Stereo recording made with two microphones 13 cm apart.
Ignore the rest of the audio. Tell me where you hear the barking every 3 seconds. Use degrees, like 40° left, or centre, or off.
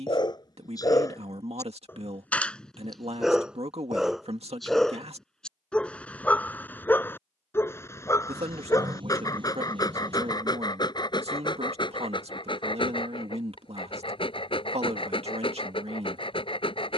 20° left, centre, 20° left, 30° left, 40° left, 40° left.